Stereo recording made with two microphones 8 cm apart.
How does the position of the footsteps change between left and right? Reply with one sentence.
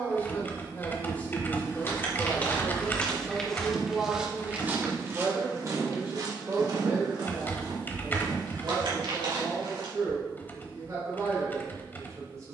You can hear the footsteps go from the left side to the right.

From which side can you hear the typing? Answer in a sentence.
In this clip you hear the typing on the left.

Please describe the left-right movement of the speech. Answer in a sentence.
In this clip you hear the speech move from left to right.